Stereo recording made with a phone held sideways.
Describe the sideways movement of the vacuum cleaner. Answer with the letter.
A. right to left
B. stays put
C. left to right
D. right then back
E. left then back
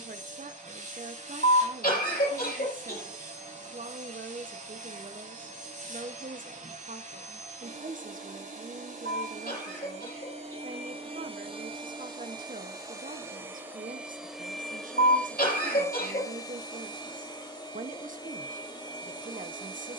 A.